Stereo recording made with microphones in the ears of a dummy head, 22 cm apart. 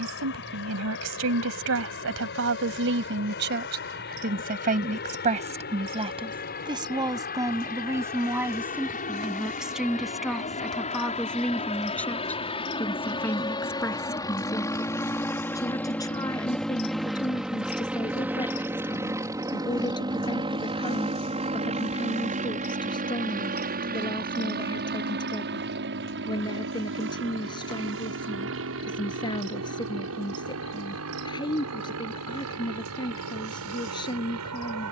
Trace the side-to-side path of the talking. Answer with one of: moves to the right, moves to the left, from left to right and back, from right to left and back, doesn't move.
moves to the left.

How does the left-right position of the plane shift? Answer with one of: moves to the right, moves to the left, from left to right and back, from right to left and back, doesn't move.
moves to the right.